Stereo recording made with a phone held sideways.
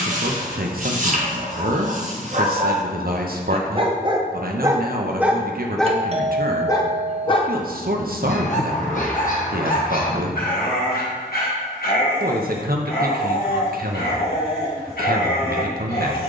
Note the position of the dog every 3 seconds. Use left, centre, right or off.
right, right, left, left, left, left.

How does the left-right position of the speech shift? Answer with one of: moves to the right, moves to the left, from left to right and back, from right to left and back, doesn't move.
doesn't move.